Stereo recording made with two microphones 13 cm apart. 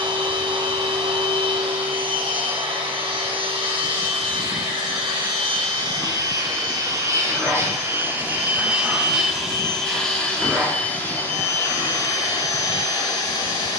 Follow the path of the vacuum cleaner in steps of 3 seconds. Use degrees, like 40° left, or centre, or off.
50° right, 40° right, 20° right, 10° left, 30° left.